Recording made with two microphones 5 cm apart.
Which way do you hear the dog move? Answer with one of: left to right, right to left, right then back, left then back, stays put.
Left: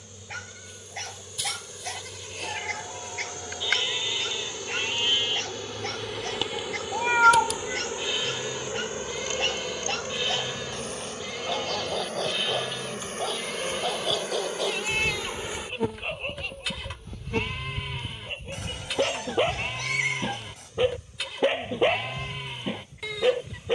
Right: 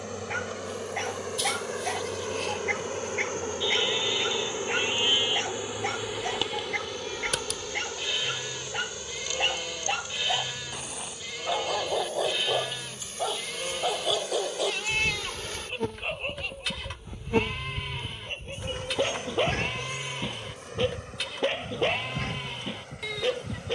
right to left.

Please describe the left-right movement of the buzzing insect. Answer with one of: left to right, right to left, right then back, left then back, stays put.
left then back.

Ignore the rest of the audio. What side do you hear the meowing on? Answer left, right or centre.
left.